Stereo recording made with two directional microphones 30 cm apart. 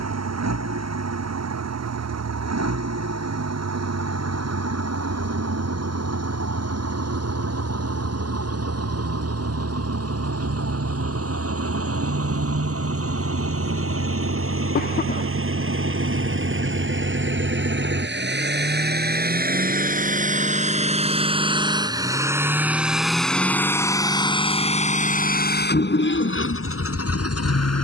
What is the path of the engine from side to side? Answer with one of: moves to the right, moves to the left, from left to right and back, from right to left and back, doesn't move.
moves to the left.